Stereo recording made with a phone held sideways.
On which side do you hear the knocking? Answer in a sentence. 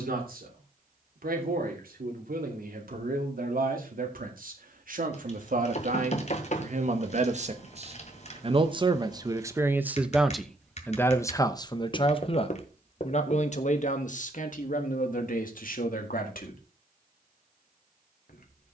In this clip you hear the knocking on the left.